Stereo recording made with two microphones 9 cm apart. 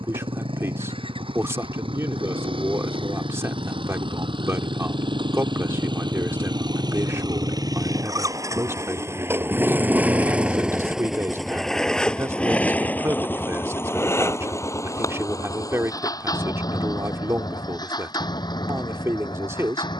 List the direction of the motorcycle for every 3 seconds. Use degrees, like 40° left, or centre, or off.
80° right, 60° right, 40° right, 10° right, 20° left, 40° left, 50° left.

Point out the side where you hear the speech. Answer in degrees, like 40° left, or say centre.
30° right.